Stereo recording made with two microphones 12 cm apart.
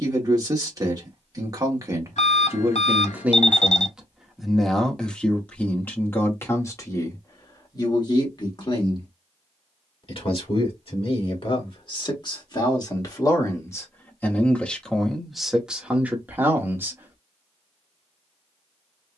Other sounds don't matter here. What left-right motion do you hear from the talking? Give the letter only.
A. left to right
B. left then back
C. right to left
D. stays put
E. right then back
B.